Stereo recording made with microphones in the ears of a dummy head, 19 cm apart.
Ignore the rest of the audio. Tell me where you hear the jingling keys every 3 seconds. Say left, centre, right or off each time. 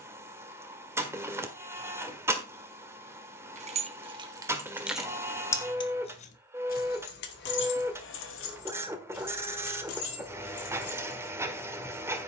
off, centre, left, left.